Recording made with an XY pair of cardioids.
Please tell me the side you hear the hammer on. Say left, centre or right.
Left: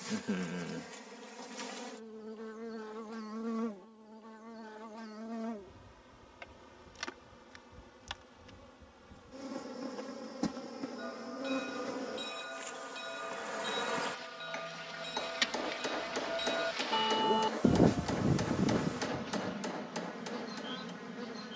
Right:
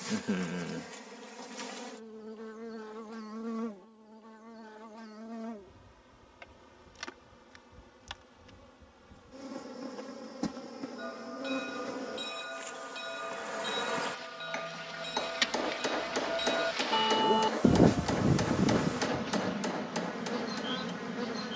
right.